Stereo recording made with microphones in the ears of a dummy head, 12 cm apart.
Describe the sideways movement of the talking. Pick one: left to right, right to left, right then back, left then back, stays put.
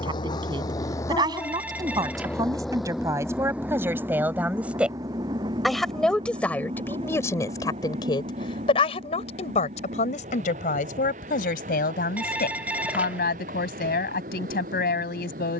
right to left.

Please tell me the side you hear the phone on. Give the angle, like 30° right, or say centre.
10° right.